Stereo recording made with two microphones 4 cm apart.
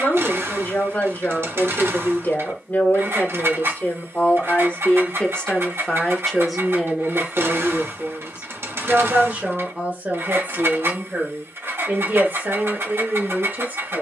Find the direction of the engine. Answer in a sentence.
In this clip you hear the engine on the right.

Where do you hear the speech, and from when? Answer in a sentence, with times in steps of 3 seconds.
In this clip you hear the speech on the left from 0 s, in the centre from 6 s and on the right from 9 s.